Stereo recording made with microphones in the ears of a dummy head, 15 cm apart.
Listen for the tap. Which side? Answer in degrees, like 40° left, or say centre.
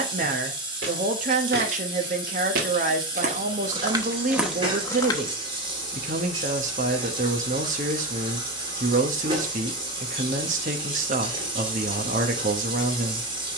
30° right.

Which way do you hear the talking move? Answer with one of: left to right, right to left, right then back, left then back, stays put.
stays put.